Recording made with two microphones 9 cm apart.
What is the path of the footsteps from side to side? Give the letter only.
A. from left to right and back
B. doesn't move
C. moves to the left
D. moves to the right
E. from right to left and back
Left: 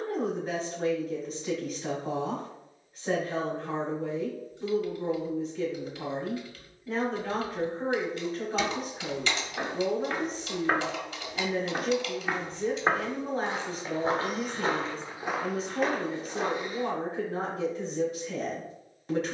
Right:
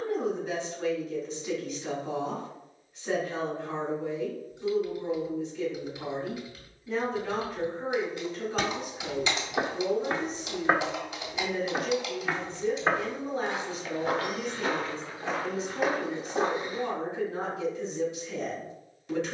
E.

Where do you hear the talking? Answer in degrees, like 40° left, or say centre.
40° left.